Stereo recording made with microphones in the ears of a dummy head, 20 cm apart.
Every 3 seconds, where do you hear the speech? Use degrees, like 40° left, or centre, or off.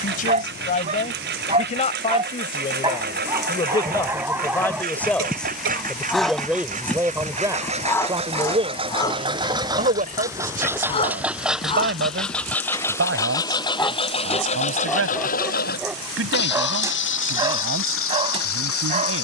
30° left, 10° left, 10° right, 40° right, 60° right, 60° right, 60° right.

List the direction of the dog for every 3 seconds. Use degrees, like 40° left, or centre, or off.
30° right, 10° right, 10° left, 20° left, 10° left, 10° right, 30° right.